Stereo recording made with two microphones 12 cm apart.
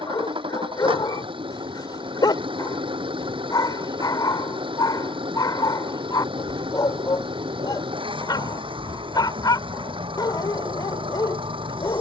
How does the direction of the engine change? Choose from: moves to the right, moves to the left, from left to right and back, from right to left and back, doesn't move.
doesn't move.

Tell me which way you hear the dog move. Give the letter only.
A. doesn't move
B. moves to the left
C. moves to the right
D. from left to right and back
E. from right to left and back
A.